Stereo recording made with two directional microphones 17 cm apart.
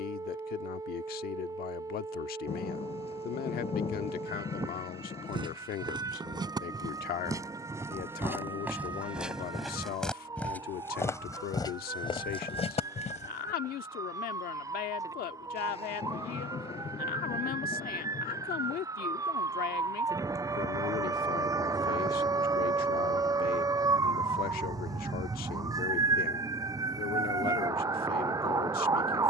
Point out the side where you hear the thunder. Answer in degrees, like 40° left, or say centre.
40° left.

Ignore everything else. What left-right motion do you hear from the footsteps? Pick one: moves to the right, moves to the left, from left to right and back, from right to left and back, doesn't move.
moves to the left.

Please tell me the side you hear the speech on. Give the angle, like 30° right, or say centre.
60° left.